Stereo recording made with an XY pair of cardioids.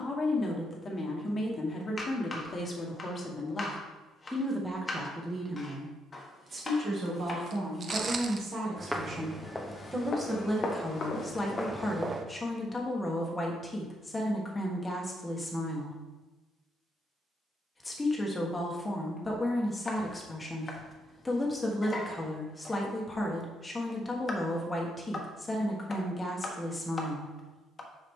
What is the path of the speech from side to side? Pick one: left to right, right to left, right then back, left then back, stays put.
right then back.